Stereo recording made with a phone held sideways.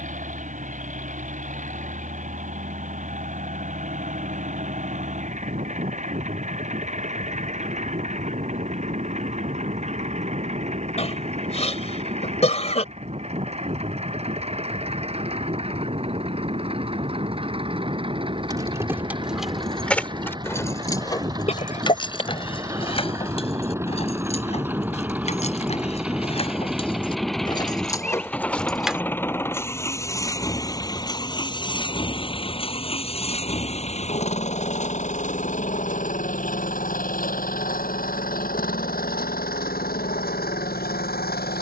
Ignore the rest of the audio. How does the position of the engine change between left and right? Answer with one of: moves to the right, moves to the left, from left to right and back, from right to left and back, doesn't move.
moves to the left.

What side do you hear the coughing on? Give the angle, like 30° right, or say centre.
40° left.